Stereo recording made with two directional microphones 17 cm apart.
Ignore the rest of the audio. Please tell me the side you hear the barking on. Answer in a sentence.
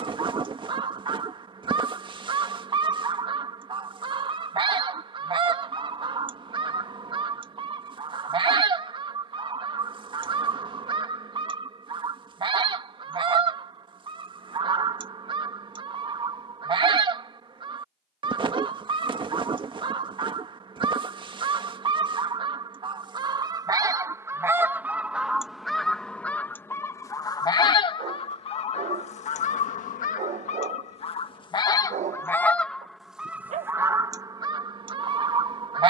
In this clip you hear the barking on the right.